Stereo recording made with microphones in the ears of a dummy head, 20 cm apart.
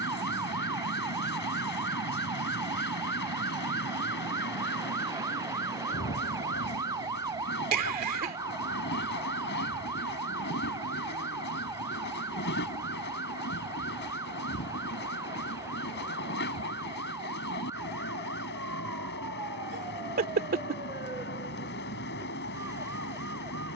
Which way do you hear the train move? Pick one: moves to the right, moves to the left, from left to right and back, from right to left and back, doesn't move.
doesn't move.